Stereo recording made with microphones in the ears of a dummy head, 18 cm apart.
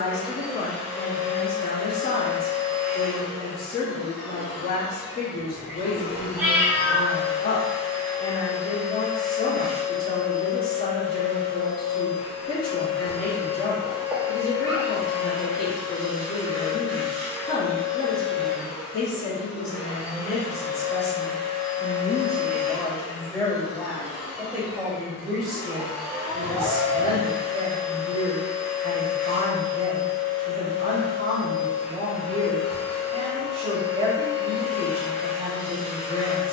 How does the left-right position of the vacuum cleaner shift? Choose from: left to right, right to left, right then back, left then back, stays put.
stays put.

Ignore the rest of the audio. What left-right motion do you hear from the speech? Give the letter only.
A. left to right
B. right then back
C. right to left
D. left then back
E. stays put
A.